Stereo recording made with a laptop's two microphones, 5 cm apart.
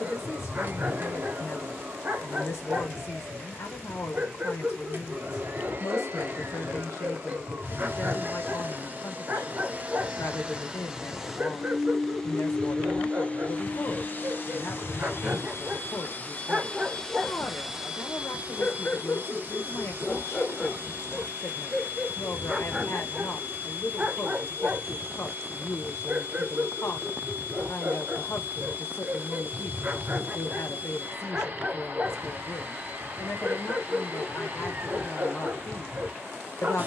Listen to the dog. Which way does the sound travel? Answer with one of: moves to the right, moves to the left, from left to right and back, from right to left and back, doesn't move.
from right to left and back.